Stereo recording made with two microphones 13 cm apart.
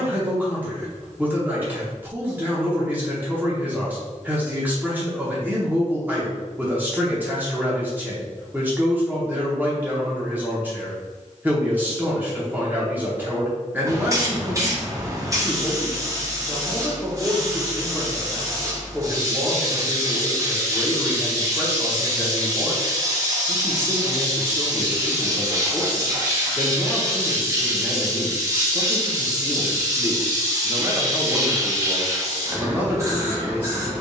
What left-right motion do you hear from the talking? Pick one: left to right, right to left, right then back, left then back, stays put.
stays put.